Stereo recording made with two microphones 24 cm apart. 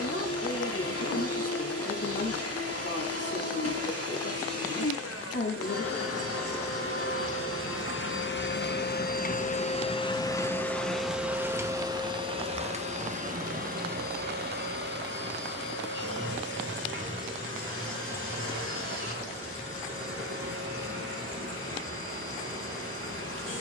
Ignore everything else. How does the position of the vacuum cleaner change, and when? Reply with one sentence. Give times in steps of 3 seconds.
You can hear the vacuum cleaner on the left from 0 s, in the centre from 9 s and on the right from 12 s.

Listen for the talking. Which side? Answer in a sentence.
In this clip you hear the talking on the left.